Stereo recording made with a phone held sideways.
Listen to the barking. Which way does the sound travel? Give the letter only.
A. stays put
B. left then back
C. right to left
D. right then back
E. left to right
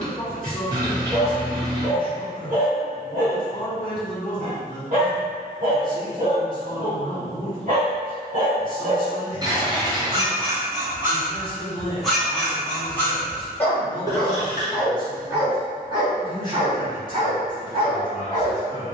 B.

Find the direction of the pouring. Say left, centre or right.
right.